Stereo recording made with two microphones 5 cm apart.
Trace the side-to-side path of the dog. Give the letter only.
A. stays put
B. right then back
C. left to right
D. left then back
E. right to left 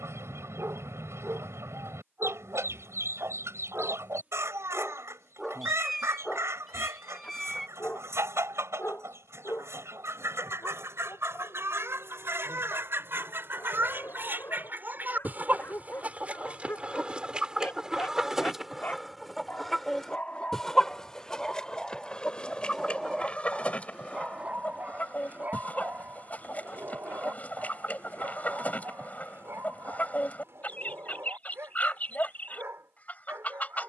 D.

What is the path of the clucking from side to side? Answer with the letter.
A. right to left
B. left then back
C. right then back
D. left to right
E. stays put
A.